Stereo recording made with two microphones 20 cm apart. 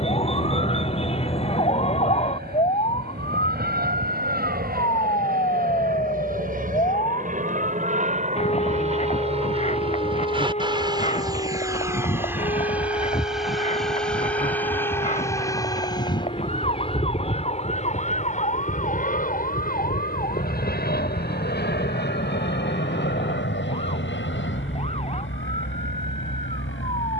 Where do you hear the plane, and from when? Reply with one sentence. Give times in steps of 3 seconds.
You can hear the plane on the right from 0 s, in the centre from 12 s and on the left from 15 s.